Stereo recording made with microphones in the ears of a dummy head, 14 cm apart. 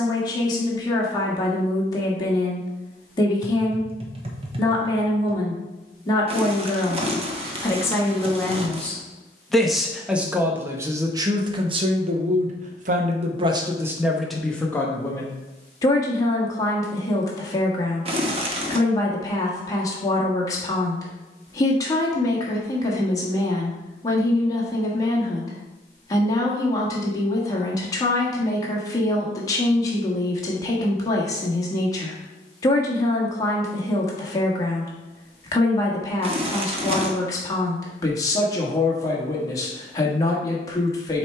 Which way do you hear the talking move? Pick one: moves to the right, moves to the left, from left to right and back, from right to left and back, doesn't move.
from left to right and back.